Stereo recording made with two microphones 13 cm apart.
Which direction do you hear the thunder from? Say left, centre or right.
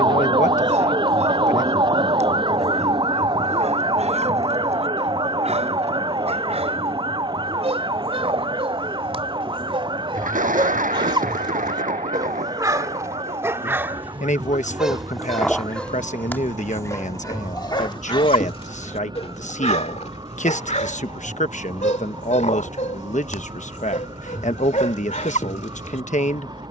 right.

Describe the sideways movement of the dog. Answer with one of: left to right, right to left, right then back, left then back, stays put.
right to left.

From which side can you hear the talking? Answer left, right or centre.
left.